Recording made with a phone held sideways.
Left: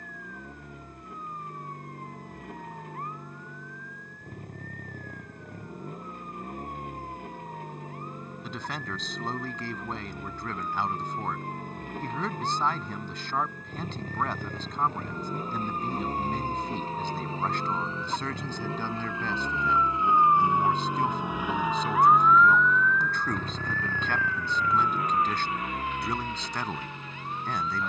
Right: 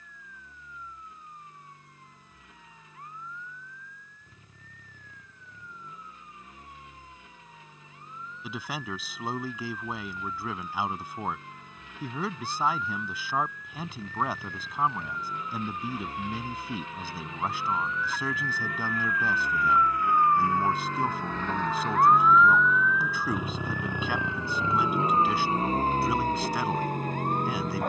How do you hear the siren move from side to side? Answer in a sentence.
You can hear the siren move to the right.